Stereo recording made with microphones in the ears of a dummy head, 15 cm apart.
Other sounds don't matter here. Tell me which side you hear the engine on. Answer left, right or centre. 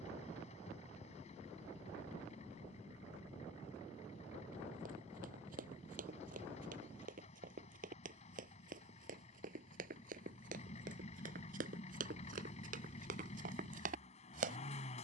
left.